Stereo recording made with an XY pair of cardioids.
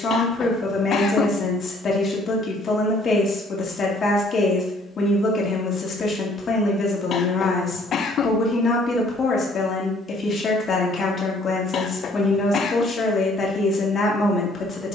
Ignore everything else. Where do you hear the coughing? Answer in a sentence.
In this clip you hear the coughing on the left.